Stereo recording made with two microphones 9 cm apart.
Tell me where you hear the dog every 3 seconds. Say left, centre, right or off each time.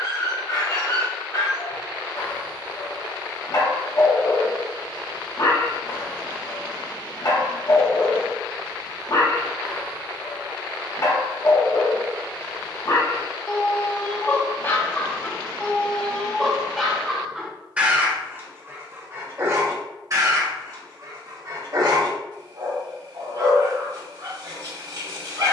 left, left, left, left, left, centre, right, right, right.